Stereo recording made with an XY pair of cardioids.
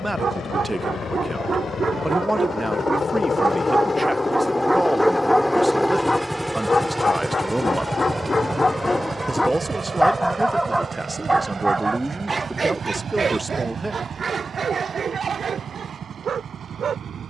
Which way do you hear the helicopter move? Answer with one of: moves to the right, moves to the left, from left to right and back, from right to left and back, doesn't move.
moves to the right.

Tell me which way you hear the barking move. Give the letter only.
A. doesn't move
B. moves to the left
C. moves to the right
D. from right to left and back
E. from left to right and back
D.